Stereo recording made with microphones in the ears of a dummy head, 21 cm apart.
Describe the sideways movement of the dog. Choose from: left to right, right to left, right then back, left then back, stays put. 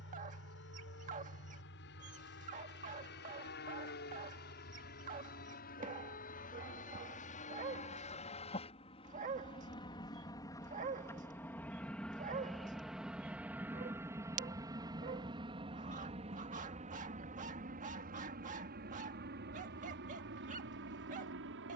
stays put.